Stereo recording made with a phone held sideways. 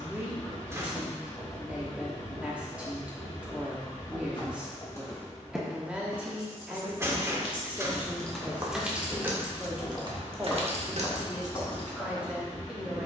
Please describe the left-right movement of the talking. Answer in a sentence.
You can hear the talking stay put.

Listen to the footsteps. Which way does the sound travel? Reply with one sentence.
You can hear the footsteps go right and come back.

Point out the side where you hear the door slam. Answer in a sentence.
In this clip you hear the door slam on the right.